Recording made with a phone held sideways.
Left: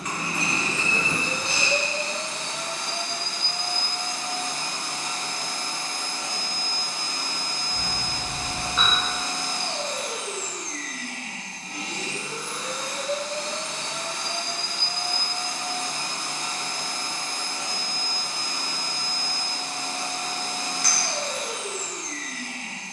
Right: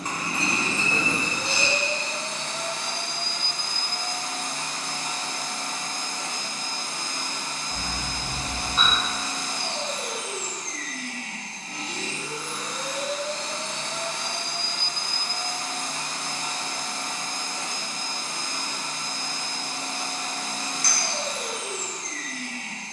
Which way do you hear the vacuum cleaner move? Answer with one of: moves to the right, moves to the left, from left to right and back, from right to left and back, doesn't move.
doesn't move.